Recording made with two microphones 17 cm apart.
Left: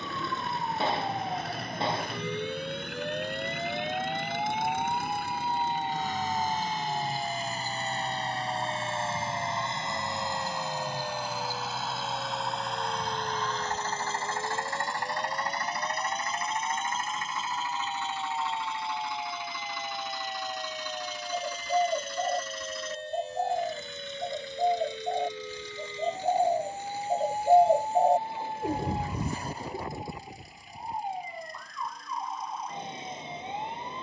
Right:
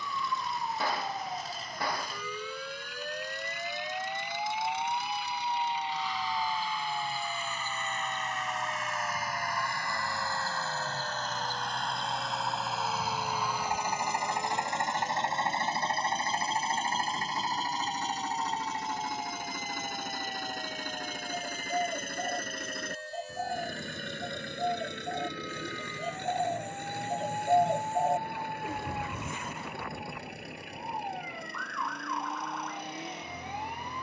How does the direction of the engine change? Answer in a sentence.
You can hear the engine go from the left side to the right.